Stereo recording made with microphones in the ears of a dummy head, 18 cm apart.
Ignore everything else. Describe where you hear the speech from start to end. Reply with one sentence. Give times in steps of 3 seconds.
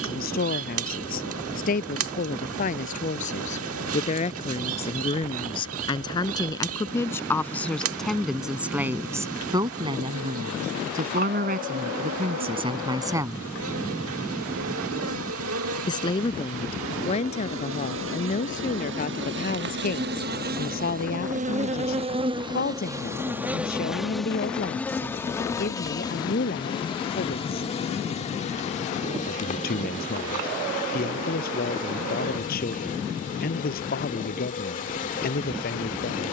You can hear the speech on the left from 0 s, in the centre from 6 s, on the right from 9 s and on the left from 15 s.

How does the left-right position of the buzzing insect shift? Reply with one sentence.
In this clip you hear the buzzing insect go from the right side to the left.